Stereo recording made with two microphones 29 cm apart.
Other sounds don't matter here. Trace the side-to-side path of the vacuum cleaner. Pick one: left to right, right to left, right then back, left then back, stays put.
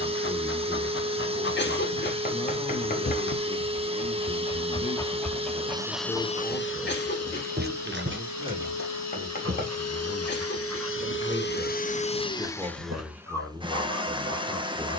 left then back.